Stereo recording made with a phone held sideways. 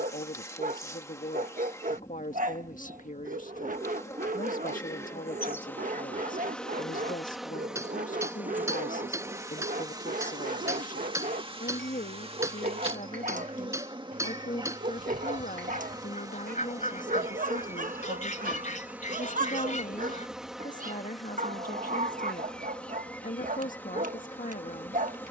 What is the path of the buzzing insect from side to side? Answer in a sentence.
In this clip you hear the buzzing insect move from left to right and back again.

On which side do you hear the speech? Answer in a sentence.
You can hear the speech on the left.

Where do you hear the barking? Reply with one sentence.
You can hear the barking on the right.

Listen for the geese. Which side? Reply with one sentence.
In this clip you hear the geese on the left.